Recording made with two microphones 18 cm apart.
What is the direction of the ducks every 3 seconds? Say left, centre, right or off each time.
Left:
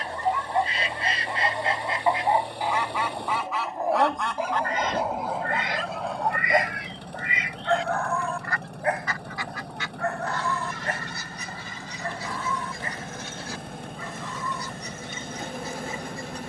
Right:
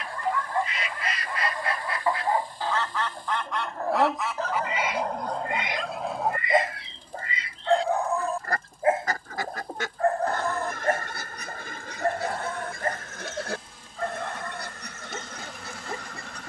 left, centre, right, right, right, right.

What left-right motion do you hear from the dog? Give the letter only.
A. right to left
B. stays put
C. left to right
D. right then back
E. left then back
C.